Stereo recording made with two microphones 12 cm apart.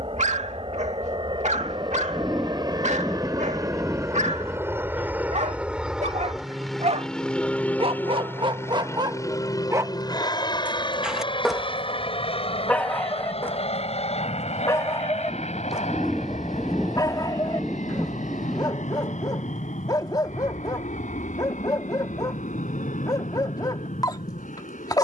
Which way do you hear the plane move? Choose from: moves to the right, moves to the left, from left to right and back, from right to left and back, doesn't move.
moves to the left.